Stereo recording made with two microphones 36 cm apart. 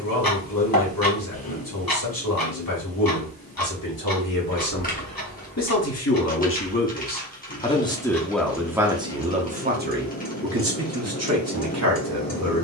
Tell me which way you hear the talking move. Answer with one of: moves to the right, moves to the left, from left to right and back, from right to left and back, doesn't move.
moves to the right.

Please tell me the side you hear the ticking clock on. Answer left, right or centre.
left.